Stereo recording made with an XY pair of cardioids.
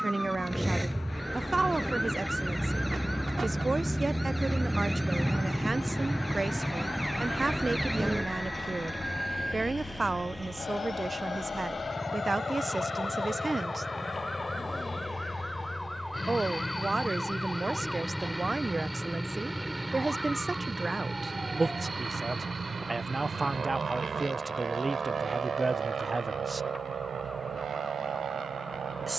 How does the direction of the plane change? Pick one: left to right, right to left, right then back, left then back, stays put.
left to right.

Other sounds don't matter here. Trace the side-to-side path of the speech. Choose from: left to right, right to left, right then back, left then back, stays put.
stays put.